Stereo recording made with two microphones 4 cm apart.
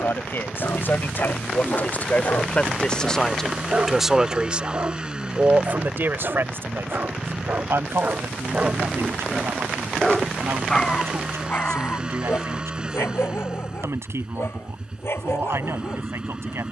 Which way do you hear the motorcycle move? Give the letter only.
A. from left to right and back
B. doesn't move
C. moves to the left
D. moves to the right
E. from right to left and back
B.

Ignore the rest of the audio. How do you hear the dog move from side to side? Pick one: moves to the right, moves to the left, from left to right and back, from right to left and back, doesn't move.
from left to right and back.